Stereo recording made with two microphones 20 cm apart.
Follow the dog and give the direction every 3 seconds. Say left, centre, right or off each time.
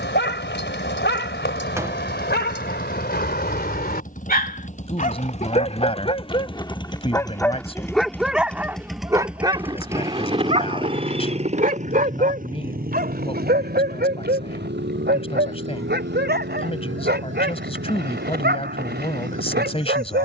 left, left, centre, right, right, right, right.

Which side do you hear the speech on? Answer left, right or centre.
left.